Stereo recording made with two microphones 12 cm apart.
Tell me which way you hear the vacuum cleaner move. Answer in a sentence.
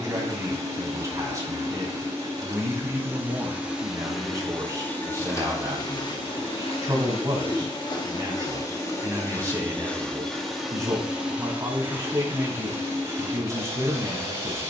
You can hear the vacuum cleaner move from right to left and back again.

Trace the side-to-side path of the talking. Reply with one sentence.
In this clip you hear the talking stay put.